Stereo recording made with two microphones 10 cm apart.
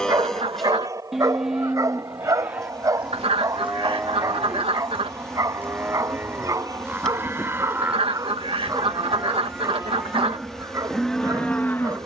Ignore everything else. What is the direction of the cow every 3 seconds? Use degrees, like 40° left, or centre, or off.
centre, 20° right, 20° right, centre.